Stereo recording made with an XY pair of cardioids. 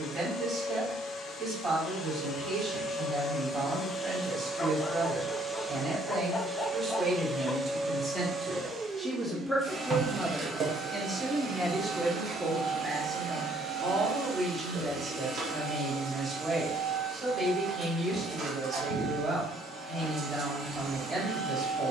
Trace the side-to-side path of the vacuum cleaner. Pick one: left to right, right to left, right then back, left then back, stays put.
left to right.